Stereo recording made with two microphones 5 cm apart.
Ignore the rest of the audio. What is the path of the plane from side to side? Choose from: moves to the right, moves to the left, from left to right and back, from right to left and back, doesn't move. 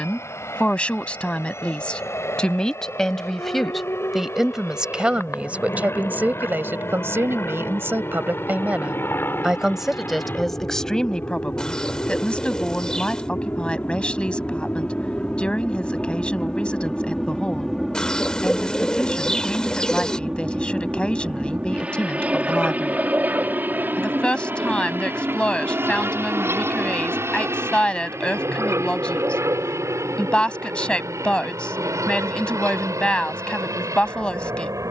moves to the right.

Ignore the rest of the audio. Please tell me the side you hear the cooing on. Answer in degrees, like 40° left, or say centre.
20° left.